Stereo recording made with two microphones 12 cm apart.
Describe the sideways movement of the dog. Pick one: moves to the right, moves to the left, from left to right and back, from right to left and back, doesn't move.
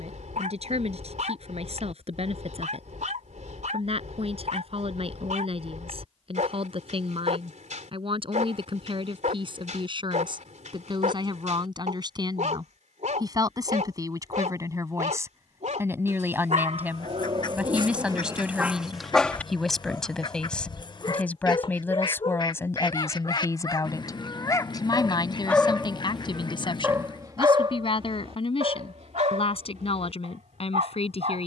from right to left and back.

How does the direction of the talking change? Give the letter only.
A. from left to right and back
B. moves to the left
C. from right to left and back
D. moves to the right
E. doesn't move
B.